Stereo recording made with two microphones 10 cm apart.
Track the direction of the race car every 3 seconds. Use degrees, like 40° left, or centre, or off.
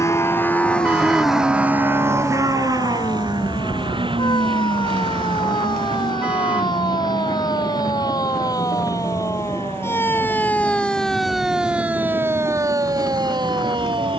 10° right, 60° right, 70° right, 80° right, 80° right.